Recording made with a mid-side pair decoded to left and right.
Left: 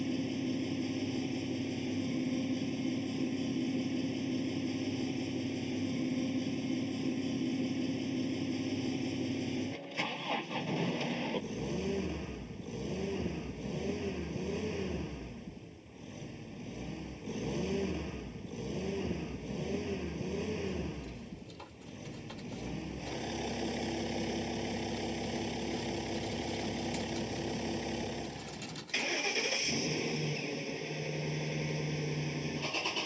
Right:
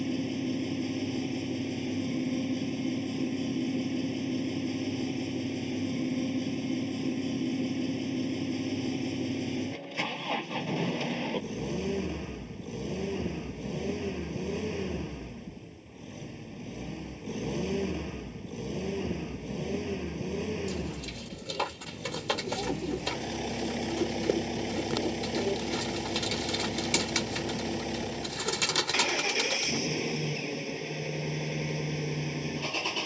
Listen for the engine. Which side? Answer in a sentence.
You can hear the engine in the centre.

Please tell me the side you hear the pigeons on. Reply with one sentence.
You can hear the pigeons on the right.